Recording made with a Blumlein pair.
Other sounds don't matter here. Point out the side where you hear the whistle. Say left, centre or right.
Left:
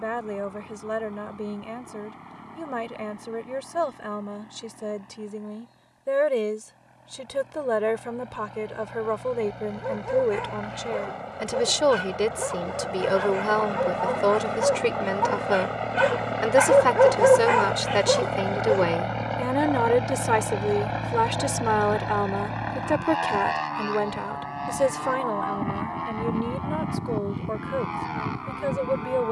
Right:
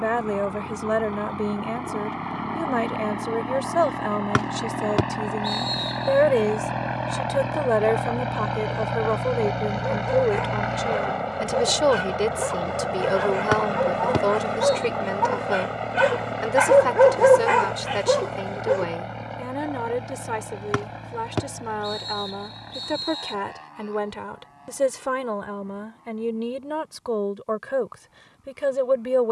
right.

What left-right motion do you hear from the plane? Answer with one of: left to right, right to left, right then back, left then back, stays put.
right to left.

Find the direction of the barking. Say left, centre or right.
centre.